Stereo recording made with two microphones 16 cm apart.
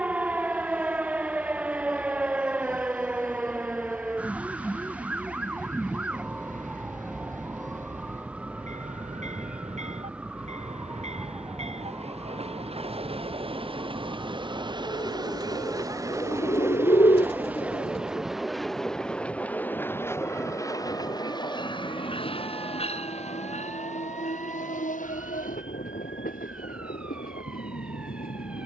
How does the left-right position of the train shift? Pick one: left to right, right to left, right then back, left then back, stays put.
right to left.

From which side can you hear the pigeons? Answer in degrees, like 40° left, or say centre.
40° left.